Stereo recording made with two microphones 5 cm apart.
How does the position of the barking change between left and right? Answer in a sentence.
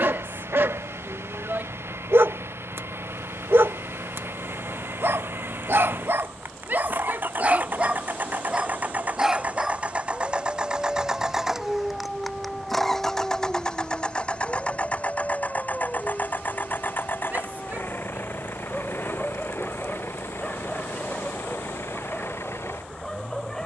In this clip you hear the barking go from the right side to the left.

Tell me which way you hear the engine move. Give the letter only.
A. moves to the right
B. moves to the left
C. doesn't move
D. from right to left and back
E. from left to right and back
B.